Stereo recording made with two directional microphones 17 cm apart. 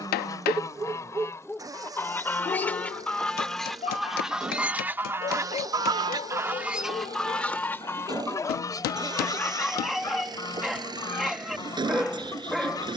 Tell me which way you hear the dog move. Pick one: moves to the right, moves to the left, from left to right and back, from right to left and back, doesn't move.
from right to left and back.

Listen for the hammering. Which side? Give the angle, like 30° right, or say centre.
70° left.